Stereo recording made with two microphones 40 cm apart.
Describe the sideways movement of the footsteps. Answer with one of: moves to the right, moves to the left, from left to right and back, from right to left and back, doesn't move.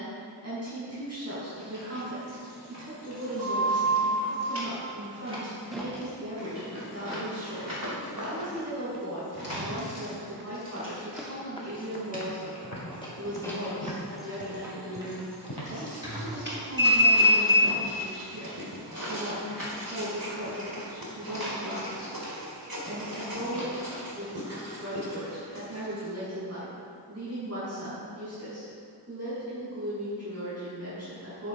moves to the left.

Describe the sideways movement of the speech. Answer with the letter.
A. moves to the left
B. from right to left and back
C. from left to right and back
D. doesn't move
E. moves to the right
D.